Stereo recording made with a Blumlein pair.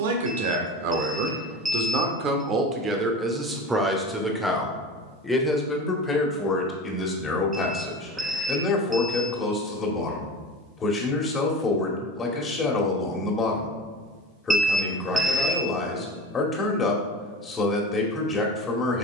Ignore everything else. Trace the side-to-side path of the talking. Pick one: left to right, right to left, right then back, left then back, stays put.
right to left.